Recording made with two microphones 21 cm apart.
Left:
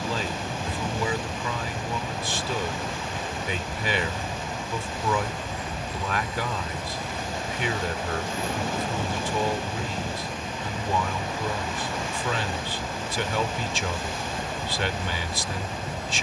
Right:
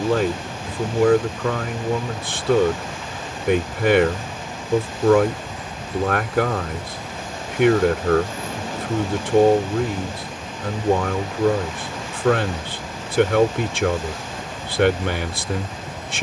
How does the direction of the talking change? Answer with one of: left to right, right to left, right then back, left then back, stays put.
stays put.